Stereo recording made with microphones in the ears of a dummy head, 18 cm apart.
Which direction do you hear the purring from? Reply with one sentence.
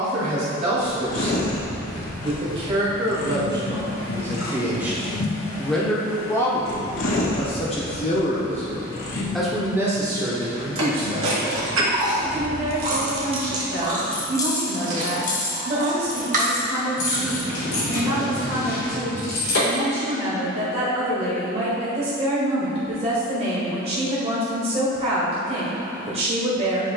You can hear the purring on the left.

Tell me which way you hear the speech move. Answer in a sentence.
You can hear the speech move from right to left and back again.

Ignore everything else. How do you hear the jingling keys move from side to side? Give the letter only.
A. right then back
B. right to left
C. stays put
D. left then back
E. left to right
B.